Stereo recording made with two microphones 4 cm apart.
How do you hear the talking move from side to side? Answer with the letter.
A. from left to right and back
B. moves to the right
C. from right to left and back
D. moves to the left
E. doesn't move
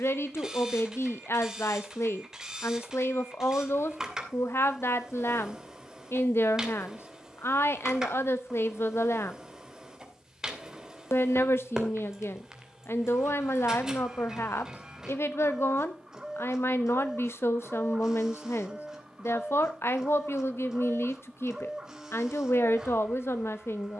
E.